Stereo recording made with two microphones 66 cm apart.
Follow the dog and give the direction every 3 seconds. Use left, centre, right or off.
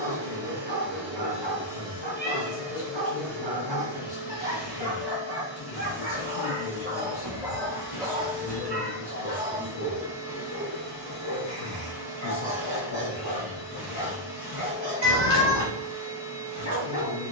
right, right, centre, left, left, left.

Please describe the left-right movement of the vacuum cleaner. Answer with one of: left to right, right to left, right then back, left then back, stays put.
right to left.